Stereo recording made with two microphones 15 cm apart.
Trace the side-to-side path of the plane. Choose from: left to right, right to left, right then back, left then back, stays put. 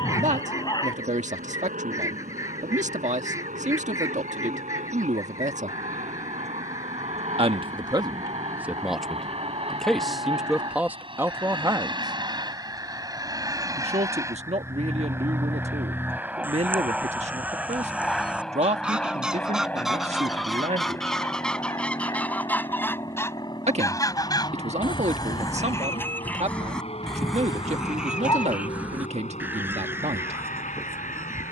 right to left.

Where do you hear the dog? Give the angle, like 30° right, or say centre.
30° left.